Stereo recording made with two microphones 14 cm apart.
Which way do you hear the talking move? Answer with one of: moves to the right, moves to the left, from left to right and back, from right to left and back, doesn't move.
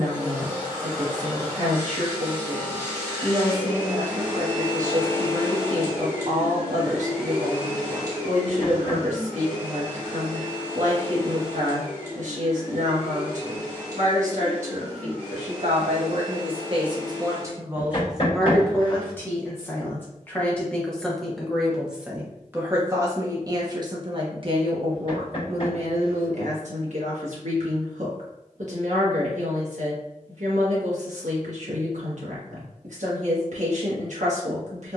from right to left and back.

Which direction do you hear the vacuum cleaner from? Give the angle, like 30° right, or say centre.
30° left.